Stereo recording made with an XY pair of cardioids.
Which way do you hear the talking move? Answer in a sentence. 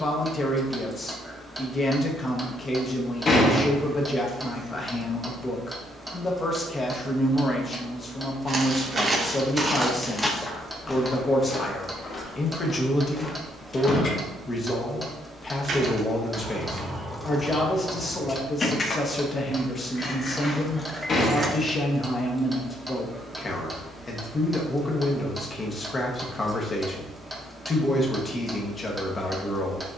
In this clip you hear the talking stay put.